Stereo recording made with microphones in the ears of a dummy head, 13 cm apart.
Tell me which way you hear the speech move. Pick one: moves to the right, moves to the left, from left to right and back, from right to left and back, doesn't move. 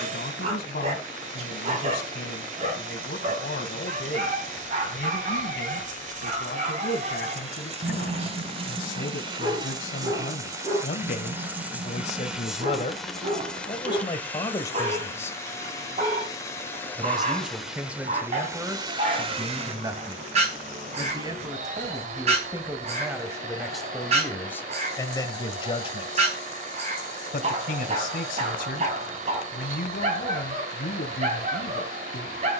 from left to right and back.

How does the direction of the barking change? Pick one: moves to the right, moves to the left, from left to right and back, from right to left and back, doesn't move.
doesn't move.